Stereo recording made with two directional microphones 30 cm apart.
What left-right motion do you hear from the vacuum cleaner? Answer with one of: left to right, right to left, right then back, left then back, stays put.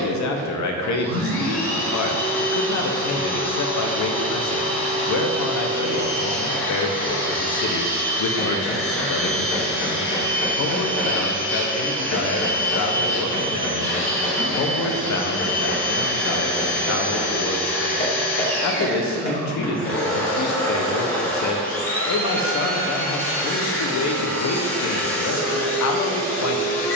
stays put.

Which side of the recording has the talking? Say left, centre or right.
left.